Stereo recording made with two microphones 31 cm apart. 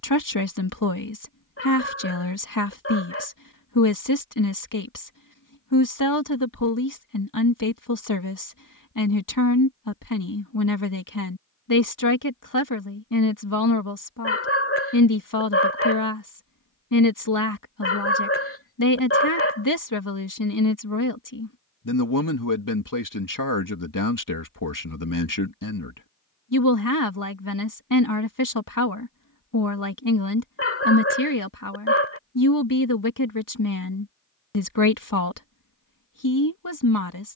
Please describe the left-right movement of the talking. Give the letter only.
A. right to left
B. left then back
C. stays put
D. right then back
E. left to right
C.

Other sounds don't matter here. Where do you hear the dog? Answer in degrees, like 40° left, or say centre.
40° left.